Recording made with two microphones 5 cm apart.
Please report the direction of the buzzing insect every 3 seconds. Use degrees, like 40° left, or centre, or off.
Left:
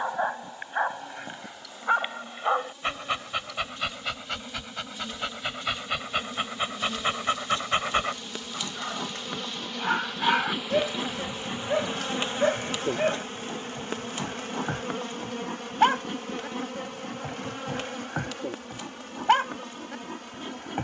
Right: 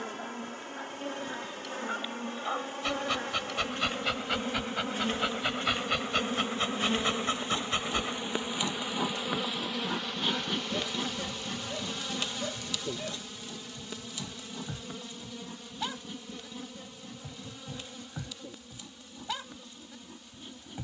60° right, 50° right, 30° right, 10° left, 50° left, 70° left, 80° left.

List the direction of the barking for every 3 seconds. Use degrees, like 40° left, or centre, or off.
50° left, centre, 30° left, 60° left, 60° left, 60° left, 60° left.